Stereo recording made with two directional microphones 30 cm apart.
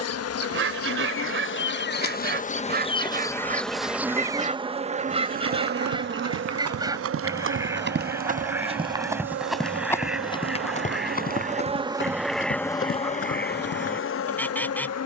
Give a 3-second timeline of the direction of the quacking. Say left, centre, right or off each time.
right, right, centre, centre, centre.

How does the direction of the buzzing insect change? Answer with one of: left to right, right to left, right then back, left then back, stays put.
right then back.